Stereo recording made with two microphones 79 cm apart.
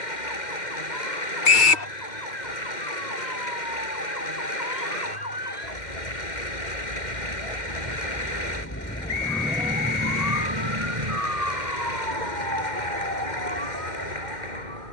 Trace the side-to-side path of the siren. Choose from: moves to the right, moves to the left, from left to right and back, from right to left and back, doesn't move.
moves to the right.